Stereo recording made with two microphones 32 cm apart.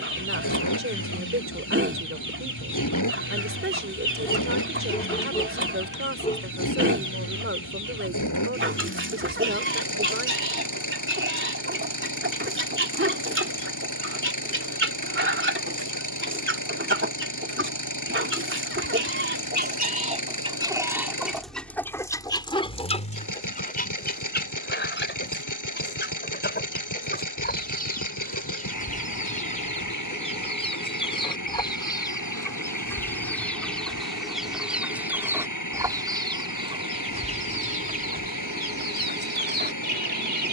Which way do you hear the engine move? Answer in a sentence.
You can hear the engine stay put.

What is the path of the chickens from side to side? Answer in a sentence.
You can hear the chickens move from right to left and back again.